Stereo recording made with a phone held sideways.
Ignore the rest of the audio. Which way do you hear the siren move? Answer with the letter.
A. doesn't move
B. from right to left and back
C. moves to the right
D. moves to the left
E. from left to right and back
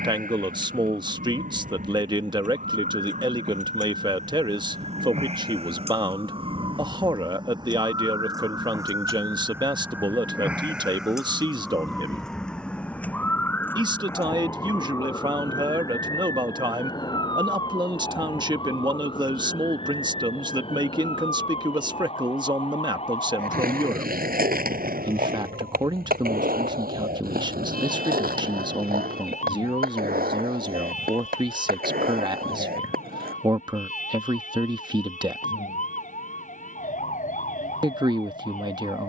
D.